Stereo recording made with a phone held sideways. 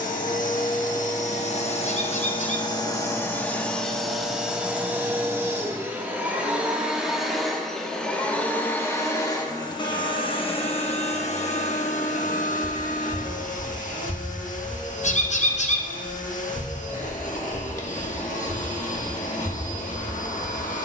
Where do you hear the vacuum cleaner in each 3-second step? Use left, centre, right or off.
left, centre, centre, left, left, left, left.